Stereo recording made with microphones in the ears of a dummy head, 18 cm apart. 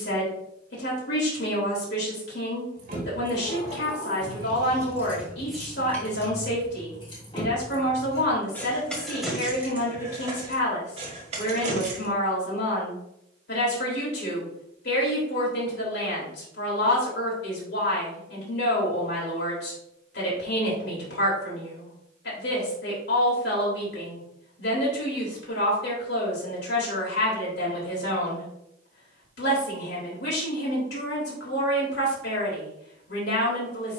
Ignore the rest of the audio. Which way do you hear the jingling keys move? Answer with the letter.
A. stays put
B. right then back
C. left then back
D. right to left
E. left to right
C.